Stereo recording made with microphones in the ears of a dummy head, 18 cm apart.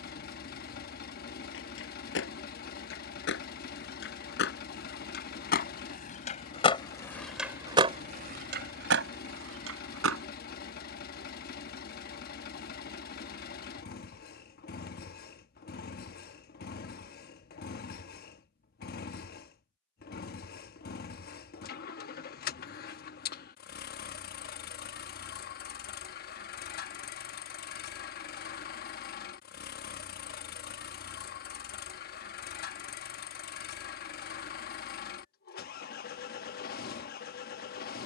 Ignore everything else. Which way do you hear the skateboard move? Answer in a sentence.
You can hear the skateboard travel towards the right.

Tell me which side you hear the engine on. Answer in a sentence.
In this clip you hear the engine on the left.